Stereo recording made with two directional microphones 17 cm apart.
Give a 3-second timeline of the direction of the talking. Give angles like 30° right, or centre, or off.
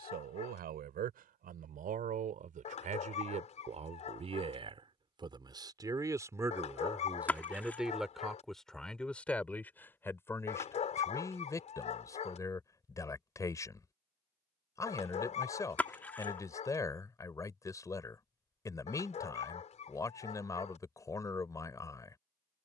60° right, 30° right, 10° right, 10° left, 20° left, 20° left, 20° left, 20° left.